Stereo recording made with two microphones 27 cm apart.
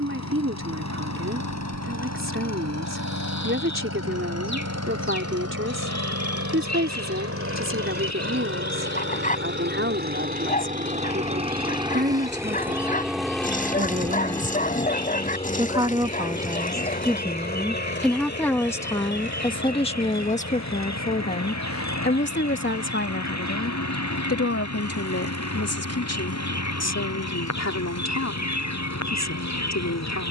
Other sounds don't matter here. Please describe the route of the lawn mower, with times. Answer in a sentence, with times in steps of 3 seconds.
You can hear the lawn mower on the right from 0 s, in the centre from 12 s and on the left from 15 s.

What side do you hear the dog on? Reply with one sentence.
In this clip you hear the dog on the left.